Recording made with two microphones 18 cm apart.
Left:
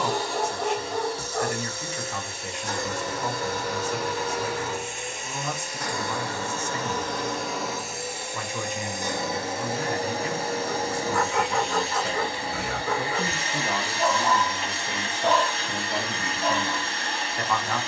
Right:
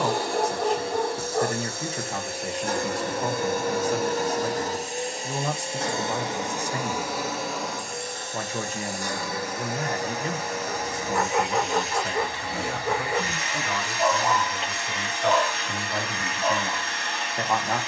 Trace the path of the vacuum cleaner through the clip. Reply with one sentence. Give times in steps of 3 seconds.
You can hear the vacuum cleaner on the right from 0 s, in the centre from 6 s and on the left from 9 s.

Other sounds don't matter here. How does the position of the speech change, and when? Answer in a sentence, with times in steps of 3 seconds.
You can hear the speech on the right from 0 s, on the left from 12 s and in the centre from 15 s.